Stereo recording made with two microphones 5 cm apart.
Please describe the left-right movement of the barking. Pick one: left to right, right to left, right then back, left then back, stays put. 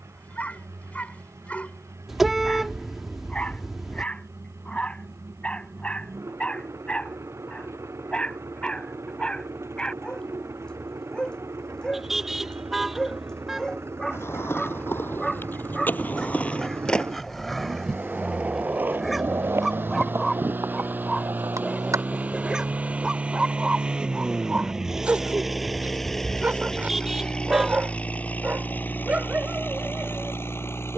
left to right.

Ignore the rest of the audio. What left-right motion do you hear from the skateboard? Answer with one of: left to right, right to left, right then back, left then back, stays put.
left to right.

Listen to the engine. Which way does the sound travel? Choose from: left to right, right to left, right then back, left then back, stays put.
right to left.